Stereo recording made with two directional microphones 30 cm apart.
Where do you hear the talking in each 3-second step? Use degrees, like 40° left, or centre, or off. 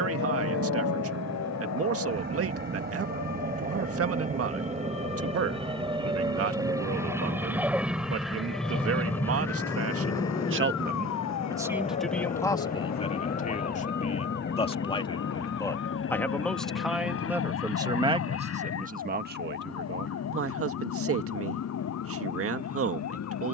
50° right, 50° right, 50° right, 40° right, 20° left, centre, 40° right, 50° right.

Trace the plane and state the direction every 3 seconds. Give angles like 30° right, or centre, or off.
40° right, 30° right, 10° right, 10° left, 30° left, 50° left, 50° left, 60° left.